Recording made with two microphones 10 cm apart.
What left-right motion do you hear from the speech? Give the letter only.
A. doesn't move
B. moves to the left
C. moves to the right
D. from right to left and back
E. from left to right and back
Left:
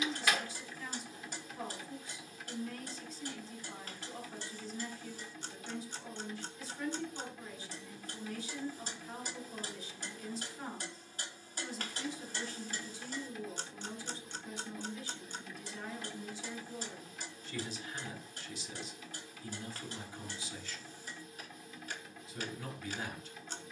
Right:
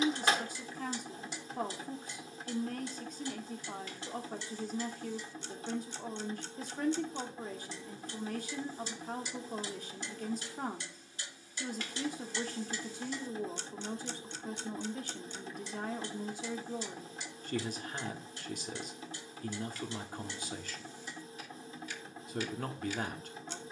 A.